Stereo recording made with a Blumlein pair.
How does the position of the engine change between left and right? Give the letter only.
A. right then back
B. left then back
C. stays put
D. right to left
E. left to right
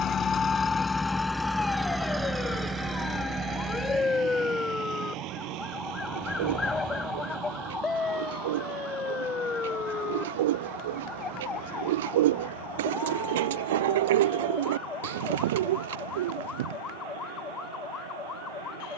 E.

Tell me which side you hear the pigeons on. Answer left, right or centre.
right.